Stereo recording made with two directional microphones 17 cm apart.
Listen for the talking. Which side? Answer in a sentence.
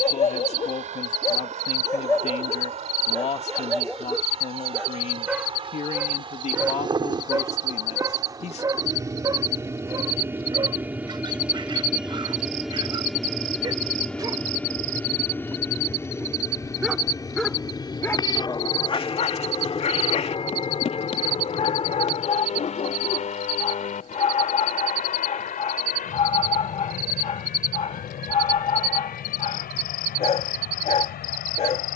In this clip you hear the talking on the left.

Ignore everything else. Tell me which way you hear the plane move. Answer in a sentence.
You can hear the plane move to the left.